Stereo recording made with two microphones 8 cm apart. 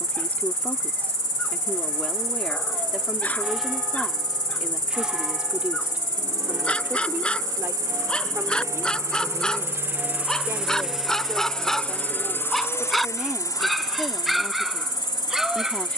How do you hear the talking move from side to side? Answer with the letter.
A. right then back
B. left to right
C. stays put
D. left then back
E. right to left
A.